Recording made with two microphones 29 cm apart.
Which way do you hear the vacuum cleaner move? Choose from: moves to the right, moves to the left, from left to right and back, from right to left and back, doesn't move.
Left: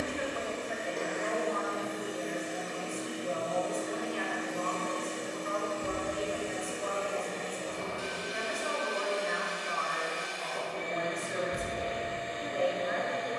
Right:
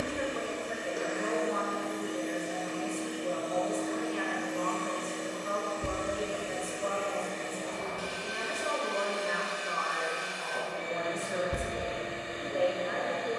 from right to left and back.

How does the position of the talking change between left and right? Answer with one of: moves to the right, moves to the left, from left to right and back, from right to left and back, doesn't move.
doesn't move.